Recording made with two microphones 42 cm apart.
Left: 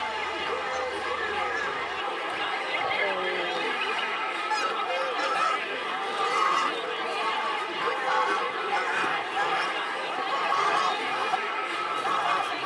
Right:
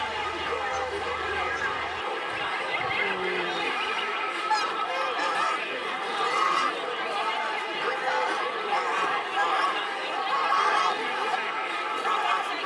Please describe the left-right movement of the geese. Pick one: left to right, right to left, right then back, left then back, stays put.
right to left.